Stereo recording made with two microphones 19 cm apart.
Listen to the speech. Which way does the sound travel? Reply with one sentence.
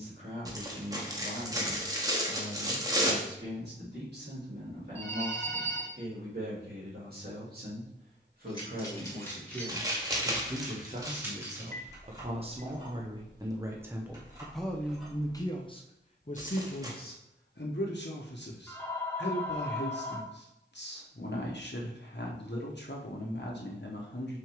In this clip you hear the speech travel towards the left.